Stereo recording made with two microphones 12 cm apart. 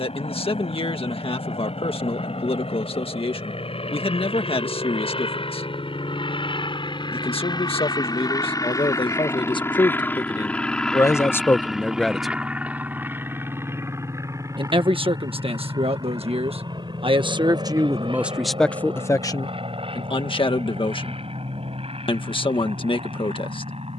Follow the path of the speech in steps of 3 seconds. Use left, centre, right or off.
left, left, left, left, right, right, left, left.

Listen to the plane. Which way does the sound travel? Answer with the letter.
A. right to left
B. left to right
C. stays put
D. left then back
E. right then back
B.